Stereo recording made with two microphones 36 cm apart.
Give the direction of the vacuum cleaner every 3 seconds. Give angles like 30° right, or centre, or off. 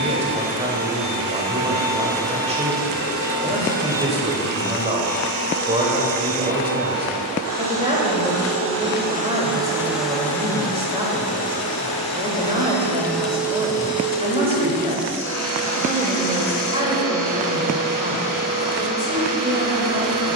60° right, 60° right, 60° right, centre, 10° right, 50° right, 60° right.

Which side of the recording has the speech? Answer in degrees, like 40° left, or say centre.
20° right.